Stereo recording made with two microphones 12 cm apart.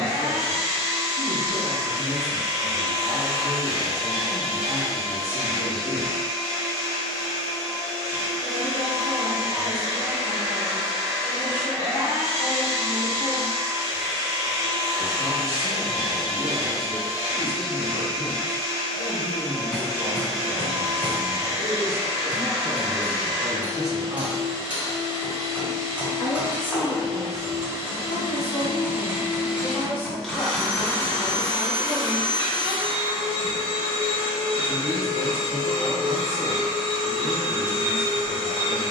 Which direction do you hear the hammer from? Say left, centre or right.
centre.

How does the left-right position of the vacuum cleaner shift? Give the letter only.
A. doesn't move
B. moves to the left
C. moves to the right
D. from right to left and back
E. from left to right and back
B.